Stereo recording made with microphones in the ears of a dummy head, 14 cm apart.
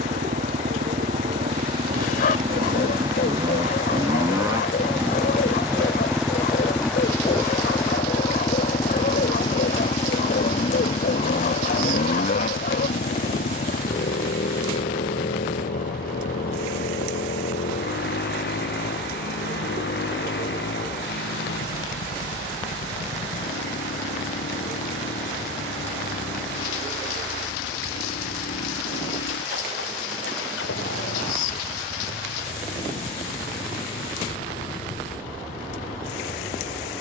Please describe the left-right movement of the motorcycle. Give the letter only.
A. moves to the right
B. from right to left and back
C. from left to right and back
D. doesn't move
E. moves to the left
E.